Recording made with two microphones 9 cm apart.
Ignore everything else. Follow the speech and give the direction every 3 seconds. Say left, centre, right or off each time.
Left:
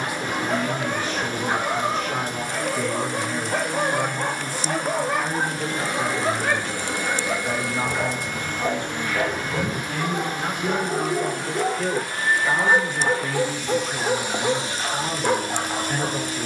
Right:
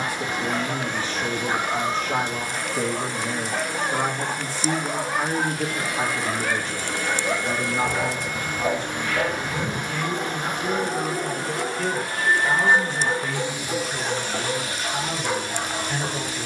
right, right, centre, left, left, left.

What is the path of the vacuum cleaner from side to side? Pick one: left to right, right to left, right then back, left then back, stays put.
right then back.